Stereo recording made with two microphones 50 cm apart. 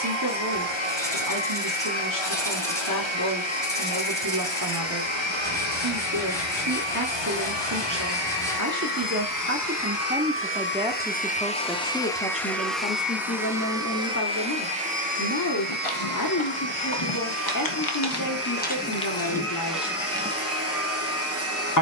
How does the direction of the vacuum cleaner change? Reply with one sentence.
In this clip you hear the vacuum cleaner go from the left side to the right.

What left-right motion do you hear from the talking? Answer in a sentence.
In this clip you hear the talking move to the left.